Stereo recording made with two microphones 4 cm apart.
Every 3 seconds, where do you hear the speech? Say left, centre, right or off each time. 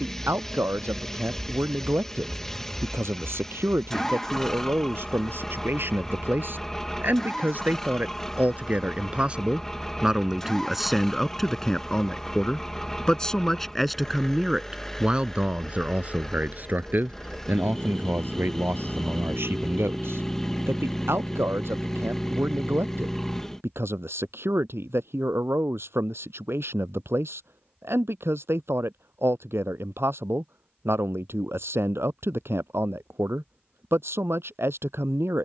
right, right, right, centre, centre, right, right, right, right, right, right, right.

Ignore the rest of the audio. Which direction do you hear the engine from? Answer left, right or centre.
centre.